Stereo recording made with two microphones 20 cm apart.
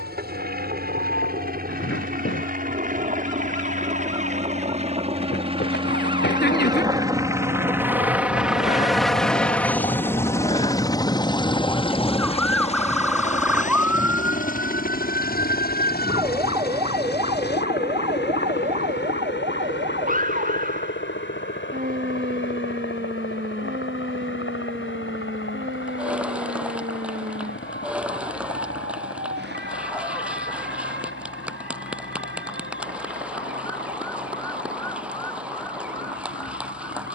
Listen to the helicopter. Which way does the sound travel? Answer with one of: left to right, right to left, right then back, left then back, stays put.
right to left.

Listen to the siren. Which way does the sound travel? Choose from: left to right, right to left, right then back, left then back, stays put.
left to right.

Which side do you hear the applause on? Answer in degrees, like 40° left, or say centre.
10° right.